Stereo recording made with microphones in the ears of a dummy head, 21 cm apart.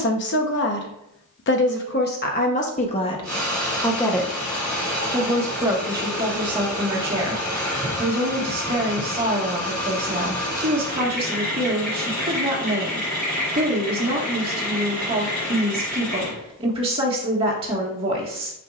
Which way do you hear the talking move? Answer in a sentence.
In this clip you hear the talking travel towards the right.